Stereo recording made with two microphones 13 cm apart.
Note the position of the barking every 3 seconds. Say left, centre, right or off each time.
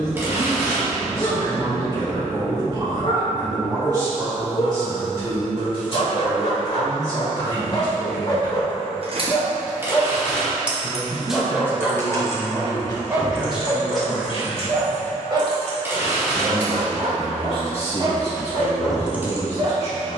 left, left, left, centre, right, right, right.